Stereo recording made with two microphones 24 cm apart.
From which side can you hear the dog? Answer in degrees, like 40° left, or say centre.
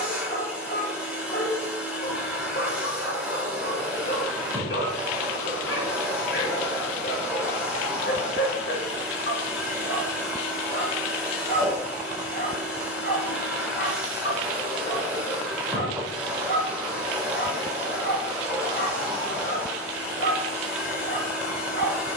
50° left.